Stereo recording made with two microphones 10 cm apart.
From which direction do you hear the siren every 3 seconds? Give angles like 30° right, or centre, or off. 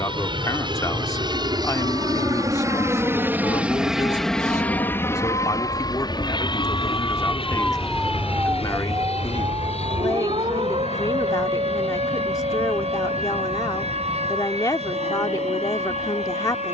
70° left, 60° left, 10° left, 60° right, 80° right, 80° right.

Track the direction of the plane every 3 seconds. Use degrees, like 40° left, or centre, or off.
50° right, 10° left, 50° left, 70° left, 80° left, 80° left.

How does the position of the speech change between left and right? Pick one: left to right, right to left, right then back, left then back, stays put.
stays put.